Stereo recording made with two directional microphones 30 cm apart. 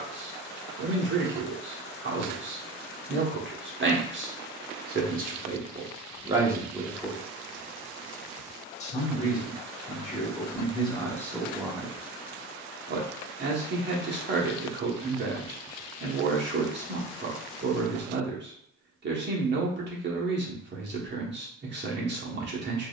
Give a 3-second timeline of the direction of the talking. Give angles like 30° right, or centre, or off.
40° right, 30° right, centre, 20° left, 30° right, 40° right, 40° right, 40° right.